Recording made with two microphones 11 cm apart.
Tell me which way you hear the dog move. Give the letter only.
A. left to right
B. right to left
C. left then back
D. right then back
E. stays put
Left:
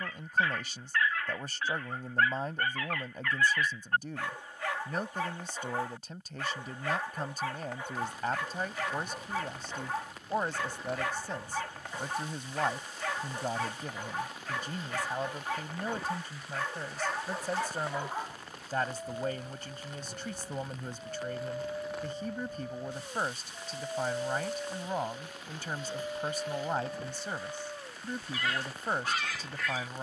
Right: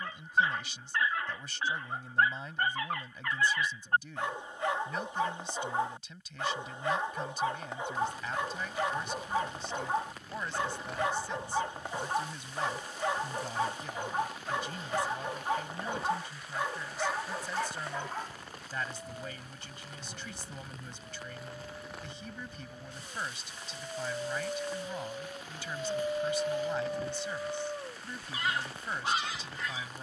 C.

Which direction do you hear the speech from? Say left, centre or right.
left.